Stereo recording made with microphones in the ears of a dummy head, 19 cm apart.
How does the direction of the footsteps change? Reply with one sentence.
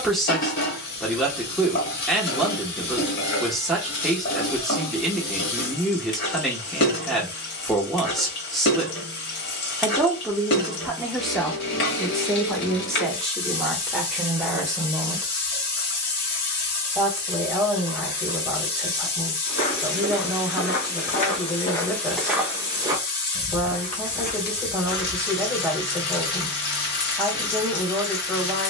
You can hear the footsteps move from left to right and back again.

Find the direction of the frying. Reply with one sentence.
In this clip you hear the frying on the left.